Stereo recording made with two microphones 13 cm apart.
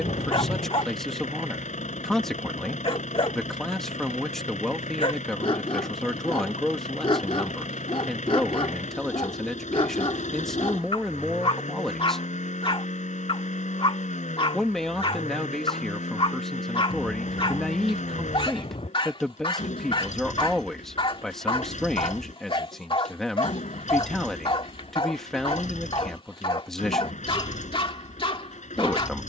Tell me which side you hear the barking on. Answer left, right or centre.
left.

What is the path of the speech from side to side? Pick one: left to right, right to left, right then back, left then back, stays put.
stays put.